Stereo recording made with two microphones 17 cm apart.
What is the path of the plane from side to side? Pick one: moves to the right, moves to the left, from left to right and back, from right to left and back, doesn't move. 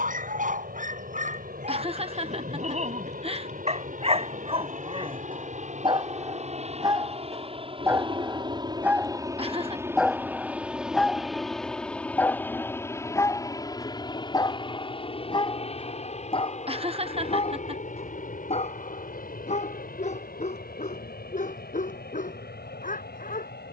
moves to the left.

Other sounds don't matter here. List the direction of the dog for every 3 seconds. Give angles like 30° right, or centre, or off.
50° right, 30° right, 20° right, centre, 20° left, 30° left, 40° left, 50° left.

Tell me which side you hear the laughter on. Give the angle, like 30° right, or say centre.
30° right.